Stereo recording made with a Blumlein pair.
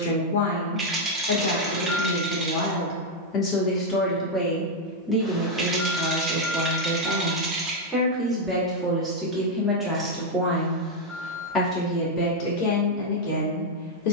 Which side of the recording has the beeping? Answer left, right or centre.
centre.